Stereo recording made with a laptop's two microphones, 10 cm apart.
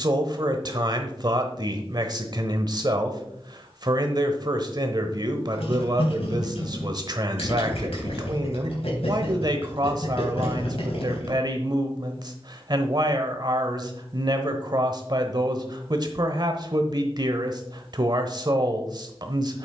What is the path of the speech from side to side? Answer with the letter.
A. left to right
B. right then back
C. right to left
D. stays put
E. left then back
D.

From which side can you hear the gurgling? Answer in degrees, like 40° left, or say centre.
70° left.